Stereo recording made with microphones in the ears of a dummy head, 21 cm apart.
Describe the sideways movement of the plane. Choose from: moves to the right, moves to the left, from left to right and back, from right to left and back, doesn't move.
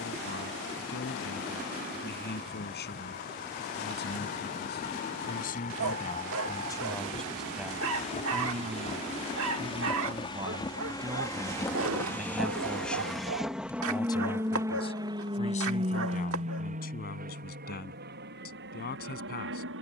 moves to the right.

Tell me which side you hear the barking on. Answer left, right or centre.
right.